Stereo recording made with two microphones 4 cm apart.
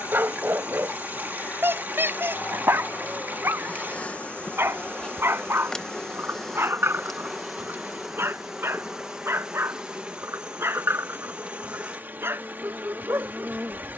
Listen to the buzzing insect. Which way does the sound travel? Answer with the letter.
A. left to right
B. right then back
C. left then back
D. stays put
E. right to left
A.